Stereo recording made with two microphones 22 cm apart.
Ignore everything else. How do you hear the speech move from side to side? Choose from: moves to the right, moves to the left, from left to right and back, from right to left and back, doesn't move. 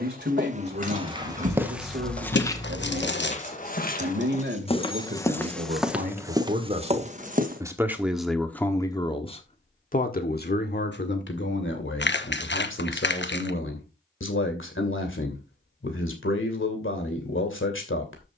moves to the left.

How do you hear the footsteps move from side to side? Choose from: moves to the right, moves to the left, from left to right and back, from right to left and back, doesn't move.
from right to left and back.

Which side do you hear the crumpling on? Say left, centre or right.
left.